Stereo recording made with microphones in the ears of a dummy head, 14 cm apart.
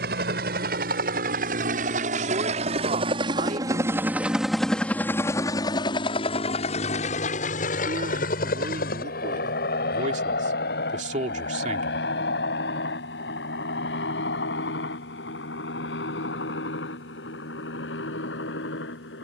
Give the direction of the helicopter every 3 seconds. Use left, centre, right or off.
right, centre, left, left, left, left, left.